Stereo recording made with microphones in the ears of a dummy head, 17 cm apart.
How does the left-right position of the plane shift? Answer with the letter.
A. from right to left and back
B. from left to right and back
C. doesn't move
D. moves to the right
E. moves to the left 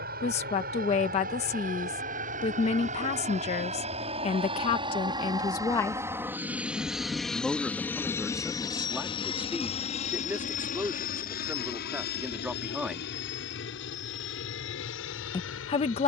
E.